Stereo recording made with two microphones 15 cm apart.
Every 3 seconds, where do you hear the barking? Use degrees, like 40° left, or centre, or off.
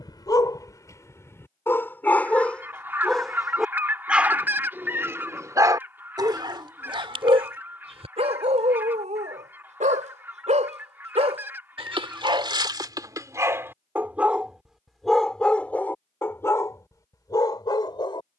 20° left, 10° right, 40° right, 50° right, 20° right, 20° left.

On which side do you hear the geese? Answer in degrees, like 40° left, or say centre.
10° right.